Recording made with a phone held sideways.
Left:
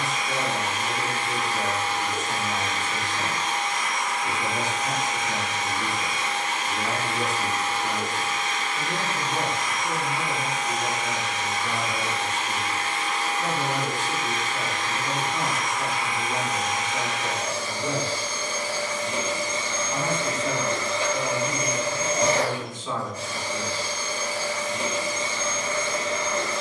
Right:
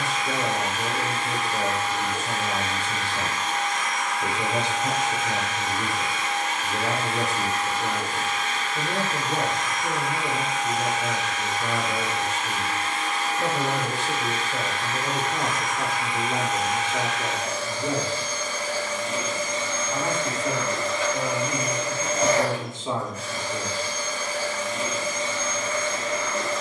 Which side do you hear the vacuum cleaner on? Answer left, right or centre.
left.